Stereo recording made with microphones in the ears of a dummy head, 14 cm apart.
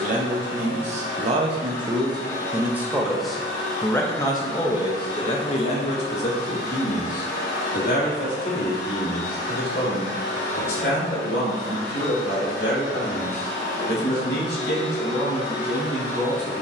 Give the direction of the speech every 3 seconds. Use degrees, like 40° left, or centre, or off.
40° right, 30° left, 60° left, 70° left, 70° left, 70° left.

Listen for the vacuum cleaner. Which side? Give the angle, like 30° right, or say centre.
70° left.